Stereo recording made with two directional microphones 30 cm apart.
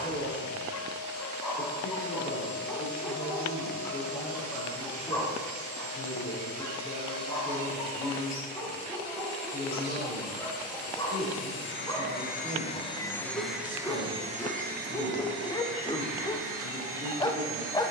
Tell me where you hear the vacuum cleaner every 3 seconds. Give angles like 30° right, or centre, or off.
70° left, 70° left, 70° left, 50° left, centre, 50° right.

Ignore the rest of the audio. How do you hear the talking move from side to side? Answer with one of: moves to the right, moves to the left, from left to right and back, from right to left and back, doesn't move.
doesn't move.